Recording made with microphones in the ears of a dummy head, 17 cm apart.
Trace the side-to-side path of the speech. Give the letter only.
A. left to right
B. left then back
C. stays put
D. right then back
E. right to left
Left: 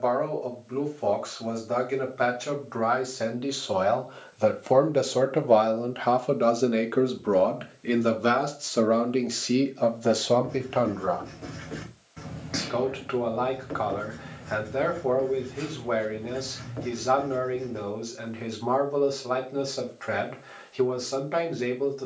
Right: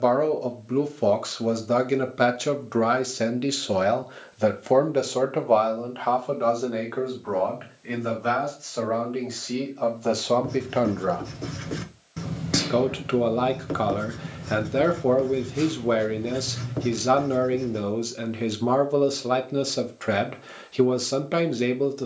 B.